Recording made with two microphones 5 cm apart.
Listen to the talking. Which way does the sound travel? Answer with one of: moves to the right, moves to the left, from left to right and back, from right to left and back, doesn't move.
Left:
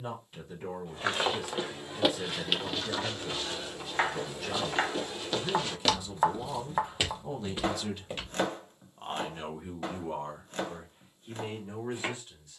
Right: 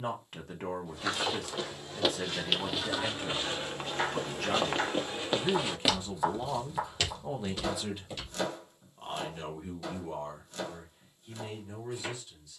moves to the left.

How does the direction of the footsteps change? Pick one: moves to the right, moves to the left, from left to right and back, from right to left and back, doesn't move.
from left to right and back.